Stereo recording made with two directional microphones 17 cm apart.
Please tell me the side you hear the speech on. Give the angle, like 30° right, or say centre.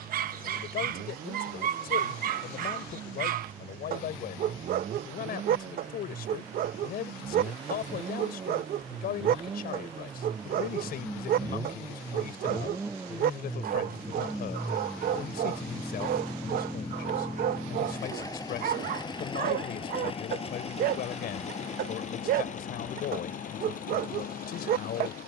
60° left.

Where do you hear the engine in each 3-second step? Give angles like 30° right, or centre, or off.
50° right, 50° right, 40° right, 30° right, 10° right, 10° left, 30° left, 50° left, 60° left.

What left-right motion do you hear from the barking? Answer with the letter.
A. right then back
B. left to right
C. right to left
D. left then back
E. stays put
E.